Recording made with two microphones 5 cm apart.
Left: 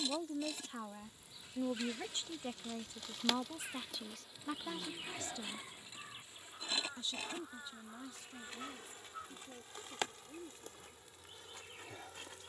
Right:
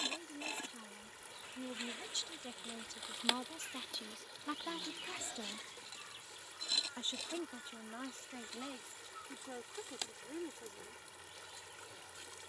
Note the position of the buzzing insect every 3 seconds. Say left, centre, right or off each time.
right, centre, left, left.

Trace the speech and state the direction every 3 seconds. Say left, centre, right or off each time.
left, centre, right, right.